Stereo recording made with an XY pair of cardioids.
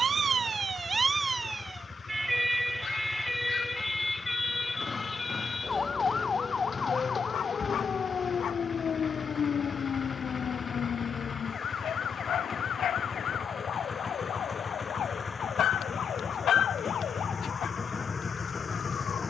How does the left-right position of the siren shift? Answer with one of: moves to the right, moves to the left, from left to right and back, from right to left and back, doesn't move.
moves to the left.